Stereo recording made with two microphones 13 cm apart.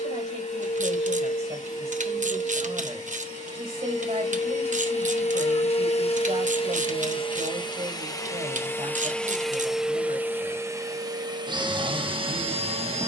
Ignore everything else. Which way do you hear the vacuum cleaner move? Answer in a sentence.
In this clip you hear the vacuum cleaner go from the left side to the right.